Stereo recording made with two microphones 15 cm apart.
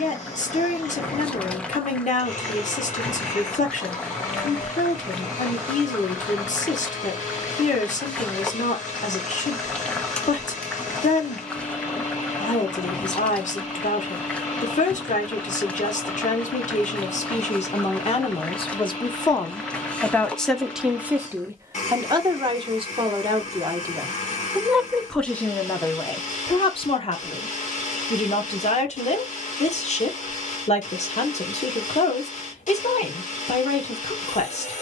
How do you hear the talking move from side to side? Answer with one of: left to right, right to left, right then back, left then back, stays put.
right then back.